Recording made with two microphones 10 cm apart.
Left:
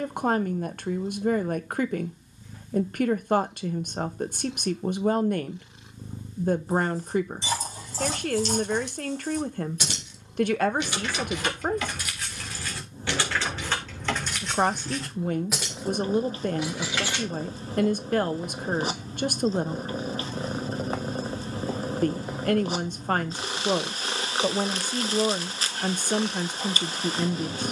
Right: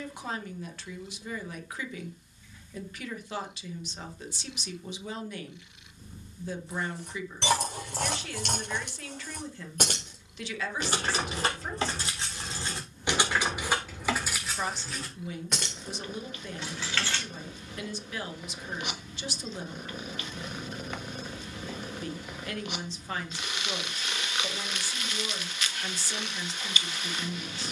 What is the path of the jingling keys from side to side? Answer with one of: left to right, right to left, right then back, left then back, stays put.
right to left.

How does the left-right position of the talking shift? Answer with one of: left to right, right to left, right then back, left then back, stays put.
stays put.